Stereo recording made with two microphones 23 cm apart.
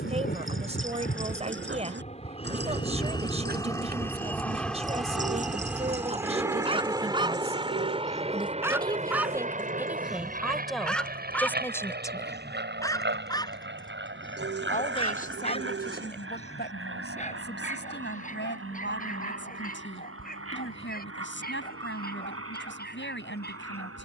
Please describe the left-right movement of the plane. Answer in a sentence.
In this clip you hear the plane travel towards the right.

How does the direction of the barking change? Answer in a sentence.
You can hear the barking travel towards the left.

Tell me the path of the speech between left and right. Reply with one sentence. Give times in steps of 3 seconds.
You can hear the speech on the right from 0 s, in the centre from 9 s and on the left from 12 s.